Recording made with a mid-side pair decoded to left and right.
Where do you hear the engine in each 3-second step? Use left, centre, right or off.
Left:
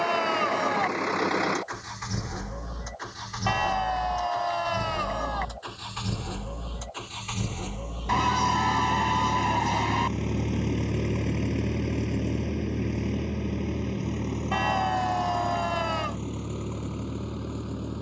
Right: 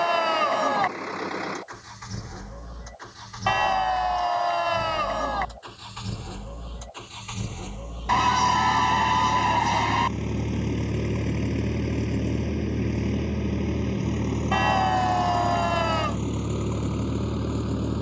left, left, left, centre, right, right.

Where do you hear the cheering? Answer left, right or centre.
right.